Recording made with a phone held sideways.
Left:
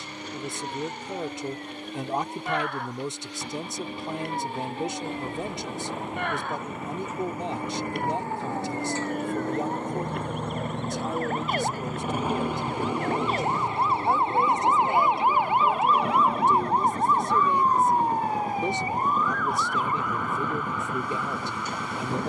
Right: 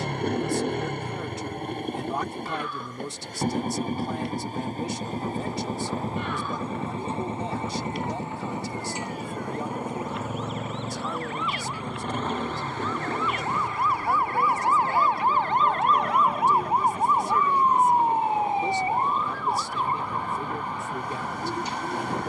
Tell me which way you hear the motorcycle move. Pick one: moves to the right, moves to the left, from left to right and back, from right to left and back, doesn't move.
moves to the left.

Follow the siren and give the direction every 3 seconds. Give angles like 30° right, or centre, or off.
80° left, 70° left, 70° left, 60° left, 30° left, centre, 30° right, 50° right.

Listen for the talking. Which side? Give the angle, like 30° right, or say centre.
20° left.